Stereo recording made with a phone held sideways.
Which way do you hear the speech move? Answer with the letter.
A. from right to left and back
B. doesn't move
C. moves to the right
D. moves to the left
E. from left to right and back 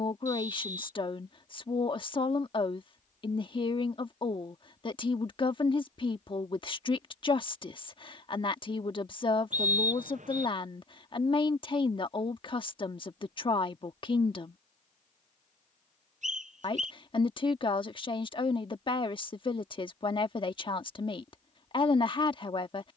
B.